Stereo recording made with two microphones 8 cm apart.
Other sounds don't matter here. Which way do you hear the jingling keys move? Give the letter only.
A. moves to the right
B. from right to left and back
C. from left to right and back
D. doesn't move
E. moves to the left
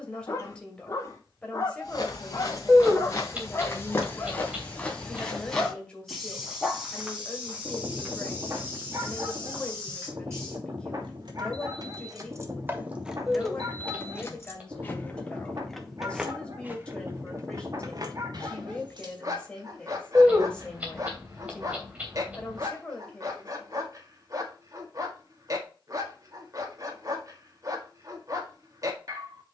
B.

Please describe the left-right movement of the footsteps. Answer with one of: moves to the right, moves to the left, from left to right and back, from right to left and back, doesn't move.
moves to the right.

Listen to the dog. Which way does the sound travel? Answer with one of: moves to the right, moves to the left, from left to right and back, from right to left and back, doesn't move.
moves to the right.